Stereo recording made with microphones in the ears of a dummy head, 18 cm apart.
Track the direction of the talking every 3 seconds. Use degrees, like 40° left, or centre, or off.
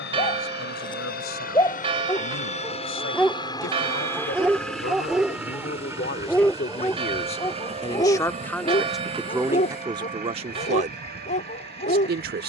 70° left, 60° left, 30° left, 20° right.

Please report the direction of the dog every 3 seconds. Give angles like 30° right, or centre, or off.
20° left, centre, 20° left, 30° left.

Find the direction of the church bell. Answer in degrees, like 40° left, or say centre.
30° right.